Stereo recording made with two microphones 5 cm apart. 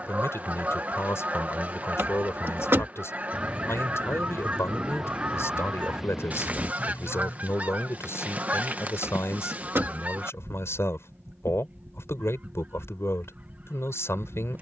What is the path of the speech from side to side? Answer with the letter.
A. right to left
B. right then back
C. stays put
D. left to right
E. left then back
C.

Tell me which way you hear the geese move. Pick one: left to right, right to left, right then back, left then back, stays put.
stays put.